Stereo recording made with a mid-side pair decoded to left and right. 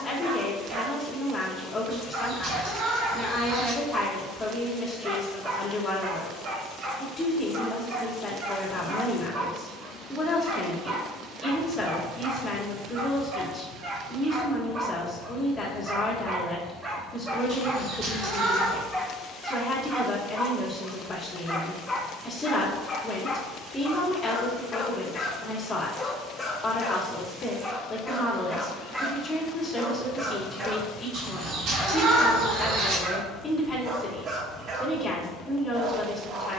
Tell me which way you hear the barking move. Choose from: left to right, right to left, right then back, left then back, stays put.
left then back.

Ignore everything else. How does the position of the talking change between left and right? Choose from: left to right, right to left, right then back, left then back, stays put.
stays put.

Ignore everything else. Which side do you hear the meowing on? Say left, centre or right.
right.